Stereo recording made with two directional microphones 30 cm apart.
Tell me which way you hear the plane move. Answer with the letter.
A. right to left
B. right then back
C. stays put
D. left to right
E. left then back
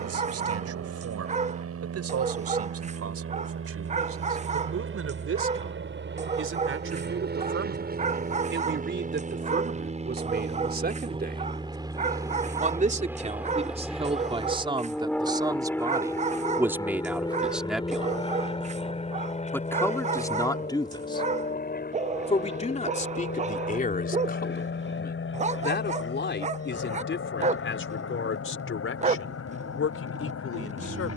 A.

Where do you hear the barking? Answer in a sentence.
You can hear the barking on the right.